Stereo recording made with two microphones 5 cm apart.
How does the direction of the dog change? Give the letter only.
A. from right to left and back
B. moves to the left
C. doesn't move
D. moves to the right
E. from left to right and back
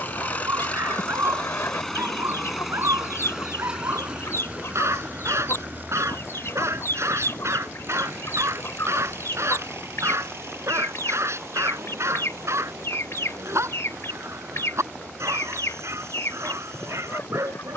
C.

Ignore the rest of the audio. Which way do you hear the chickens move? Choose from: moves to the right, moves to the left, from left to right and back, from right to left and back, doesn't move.
doesn't move.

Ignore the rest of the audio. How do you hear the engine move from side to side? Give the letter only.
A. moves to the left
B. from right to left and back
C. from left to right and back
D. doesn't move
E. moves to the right
E.